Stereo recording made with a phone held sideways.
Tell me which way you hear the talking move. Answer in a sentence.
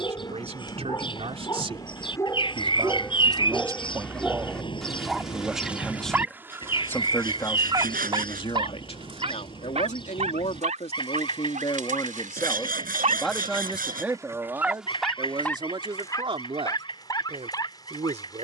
In this clip you hear the talking move from right to left and back again.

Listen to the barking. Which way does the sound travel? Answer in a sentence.
In this clip you hear the barking go right and come back.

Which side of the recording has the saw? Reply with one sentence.
You can hear the saw on the right.